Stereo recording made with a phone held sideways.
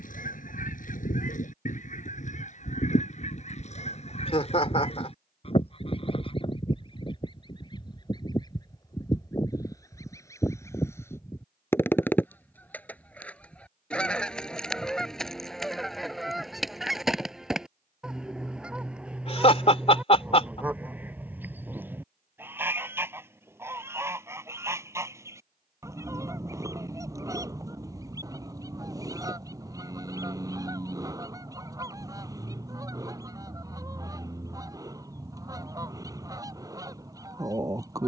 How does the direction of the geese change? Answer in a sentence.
You can hear the geese move from left to right.